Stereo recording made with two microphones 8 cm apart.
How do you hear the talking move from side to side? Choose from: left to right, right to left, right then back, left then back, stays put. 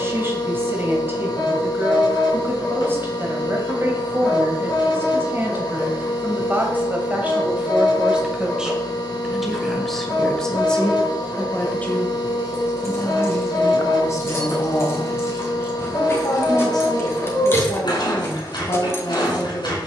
right to left.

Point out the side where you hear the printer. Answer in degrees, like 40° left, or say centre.
70° left.